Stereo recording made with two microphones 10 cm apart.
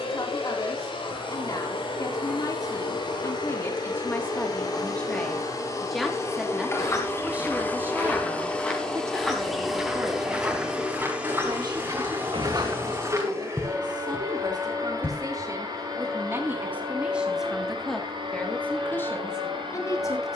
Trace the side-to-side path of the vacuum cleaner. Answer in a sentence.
In this clip you hear the vacuum cleaner move from left to right.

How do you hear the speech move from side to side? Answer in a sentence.
In this clip you hear the speech move from left to right and back again.